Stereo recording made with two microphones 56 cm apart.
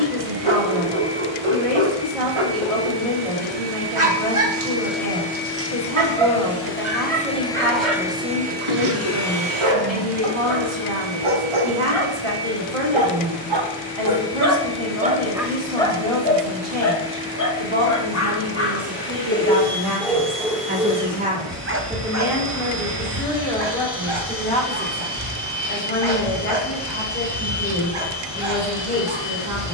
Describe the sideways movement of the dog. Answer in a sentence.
You can hear the dog move from right to left and back again.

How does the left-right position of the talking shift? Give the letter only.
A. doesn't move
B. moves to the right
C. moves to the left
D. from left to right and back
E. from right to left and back
C.